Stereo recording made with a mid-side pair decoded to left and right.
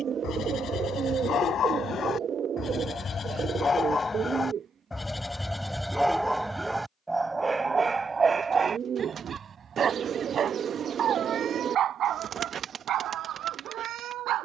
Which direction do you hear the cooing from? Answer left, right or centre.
right.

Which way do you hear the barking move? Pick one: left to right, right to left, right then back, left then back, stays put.
left to right.